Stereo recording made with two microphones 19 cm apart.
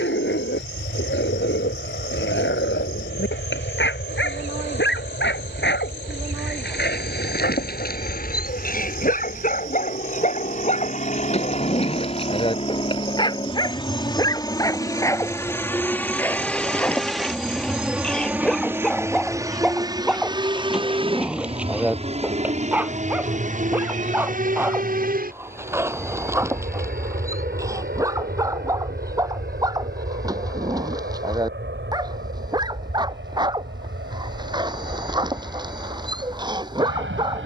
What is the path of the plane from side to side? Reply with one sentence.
You can hear the plane move from left to right.